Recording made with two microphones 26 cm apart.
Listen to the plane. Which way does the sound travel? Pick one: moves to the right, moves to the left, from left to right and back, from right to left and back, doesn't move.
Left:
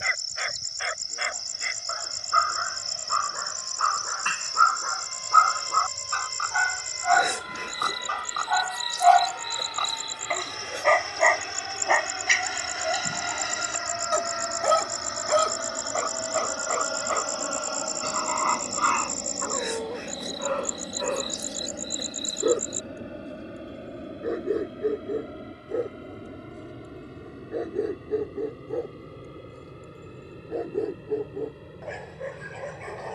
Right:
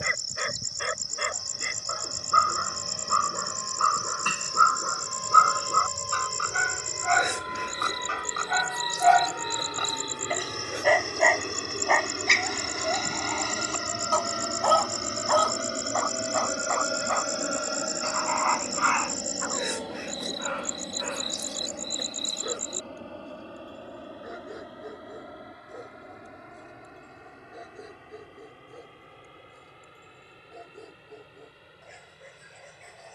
moves to the left.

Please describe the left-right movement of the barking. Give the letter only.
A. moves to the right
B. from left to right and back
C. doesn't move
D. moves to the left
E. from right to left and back
D.